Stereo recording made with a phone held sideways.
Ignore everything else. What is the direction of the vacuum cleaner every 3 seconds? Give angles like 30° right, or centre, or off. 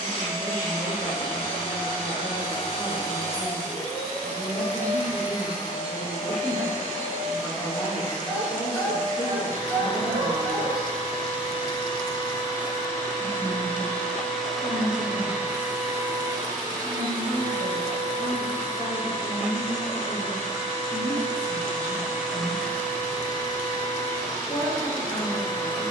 40° left, 40° left, 40° left, 40° left, 10° left, 20° right, 50° right, centre, 30° left.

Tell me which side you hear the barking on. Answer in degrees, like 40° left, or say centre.
10° left.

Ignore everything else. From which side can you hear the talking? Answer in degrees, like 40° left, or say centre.
20° left.